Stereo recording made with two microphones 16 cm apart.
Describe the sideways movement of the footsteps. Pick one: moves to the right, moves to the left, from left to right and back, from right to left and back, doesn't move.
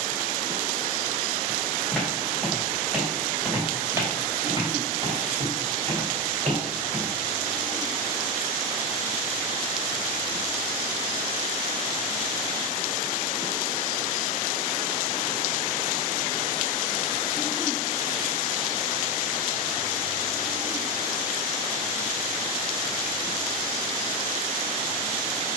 moves to the right.